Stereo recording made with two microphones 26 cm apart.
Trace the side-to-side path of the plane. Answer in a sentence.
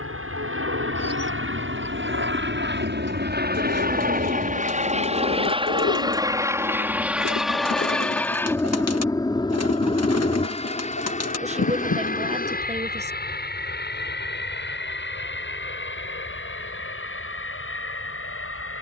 You can hear the plane move from right to left.